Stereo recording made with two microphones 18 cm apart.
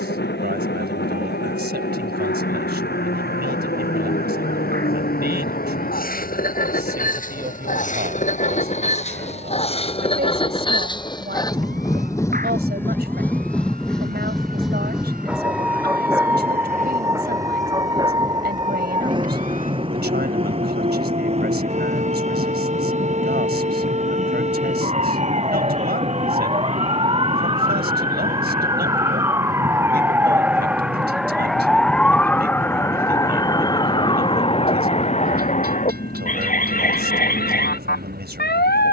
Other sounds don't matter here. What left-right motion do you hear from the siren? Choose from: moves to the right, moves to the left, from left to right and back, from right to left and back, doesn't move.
moves to the left.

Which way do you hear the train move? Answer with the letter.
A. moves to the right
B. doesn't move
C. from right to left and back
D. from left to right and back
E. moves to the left
A.